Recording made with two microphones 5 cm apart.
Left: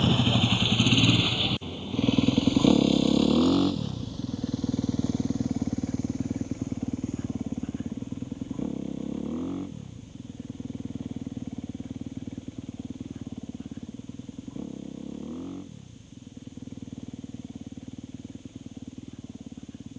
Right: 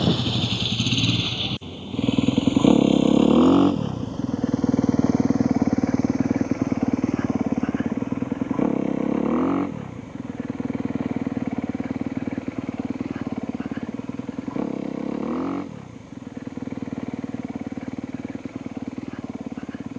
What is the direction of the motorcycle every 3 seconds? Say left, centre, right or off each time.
centre, right, right, right, right, right, right.